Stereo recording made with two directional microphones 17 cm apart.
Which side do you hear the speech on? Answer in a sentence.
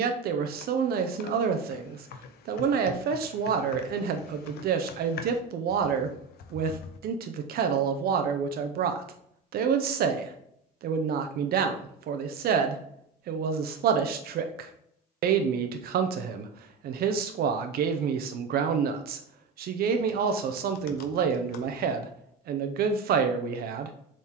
You can hear the speech on the right.